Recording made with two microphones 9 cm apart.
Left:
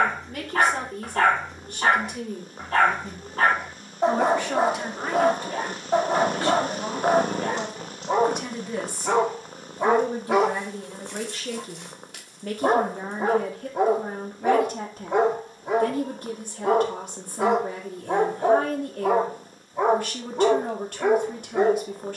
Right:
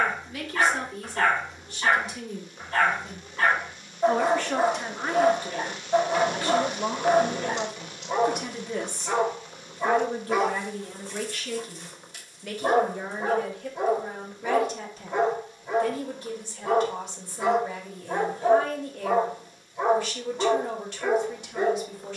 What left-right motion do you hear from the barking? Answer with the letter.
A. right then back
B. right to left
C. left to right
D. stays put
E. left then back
D.